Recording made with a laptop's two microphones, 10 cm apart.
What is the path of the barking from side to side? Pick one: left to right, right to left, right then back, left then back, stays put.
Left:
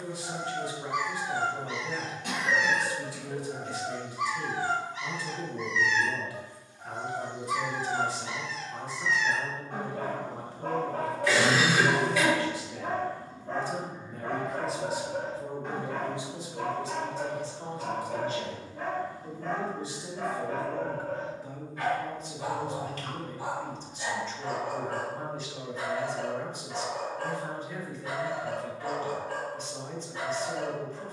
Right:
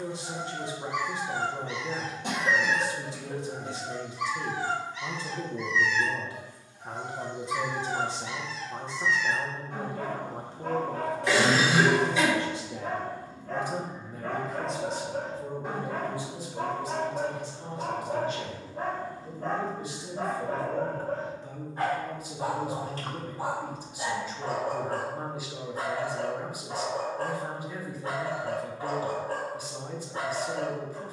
left to right.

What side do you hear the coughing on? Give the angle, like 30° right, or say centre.
30° right.